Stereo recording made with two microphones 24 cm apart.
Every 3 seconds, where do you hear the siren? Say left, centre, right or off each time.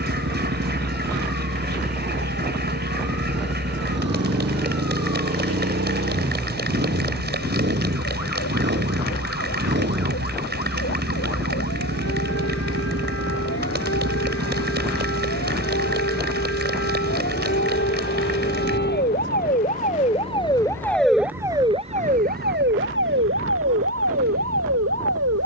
left, left, left, left, left, left, left, right, right.